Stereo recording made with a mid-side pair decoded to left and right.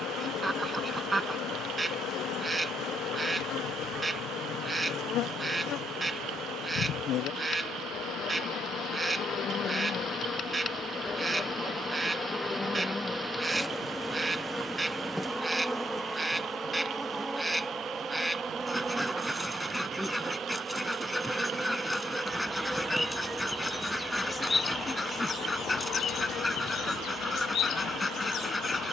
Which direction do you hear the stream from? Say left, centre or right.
right.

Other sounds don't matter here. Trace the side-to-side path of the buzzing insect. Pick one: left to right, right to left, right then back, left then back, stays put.
right then back.